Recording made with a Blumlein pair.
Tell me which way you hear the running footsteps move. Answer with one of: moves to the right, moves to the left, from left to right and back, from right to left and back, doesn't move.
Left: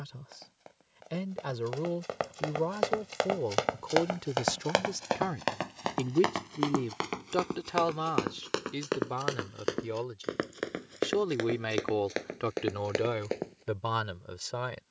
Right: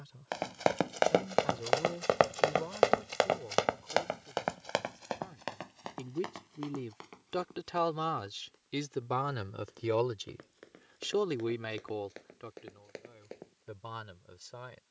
moves to the left.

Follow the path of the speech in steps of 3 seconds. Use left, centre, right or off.
left, left, centre, centre, left.